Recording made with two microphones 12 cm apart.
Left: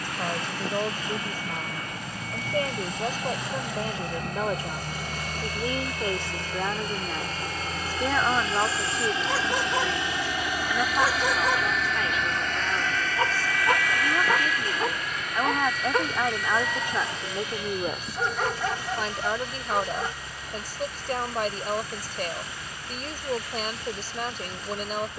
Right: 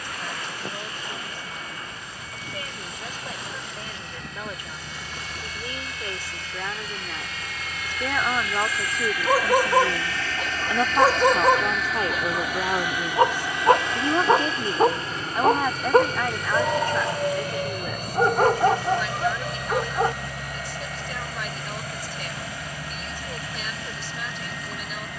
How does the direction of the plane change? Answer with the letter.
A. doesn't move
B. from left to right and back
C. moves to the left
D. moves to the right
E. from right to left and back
D.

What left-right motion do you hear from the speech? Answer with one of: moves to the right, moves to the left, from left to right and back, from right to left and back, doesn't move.
from left to right and back.